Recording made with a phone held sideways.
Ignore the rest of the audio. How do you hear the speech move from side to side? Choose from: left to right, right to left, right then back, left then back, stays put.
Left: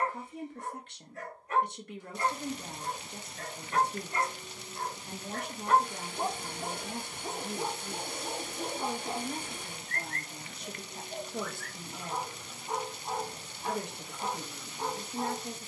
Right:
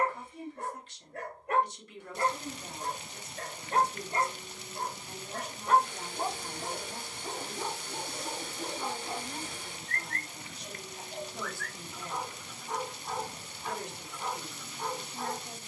stays put.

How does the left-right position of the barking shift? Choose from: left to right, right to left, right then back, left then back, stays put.
right to left.